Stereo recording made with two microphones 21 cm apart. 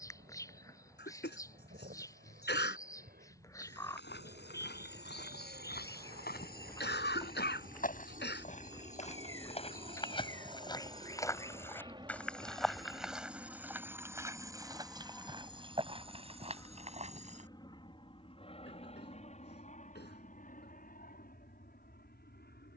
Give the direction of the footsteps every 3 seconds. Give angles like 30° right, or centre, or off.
off, 60° left, 50° left, 20° left, 10° right, 30° right, off, off.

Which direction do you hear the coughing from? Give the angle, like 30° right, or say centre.
60° left.